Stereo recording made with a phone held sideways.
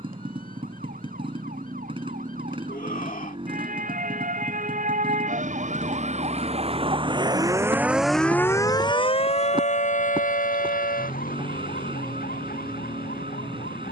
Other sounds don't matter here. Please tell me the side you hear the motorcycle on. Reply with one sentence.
You can hear the motorcycle on the right.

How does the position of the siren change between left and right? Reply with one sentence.
You can hear the siren travel towards the left.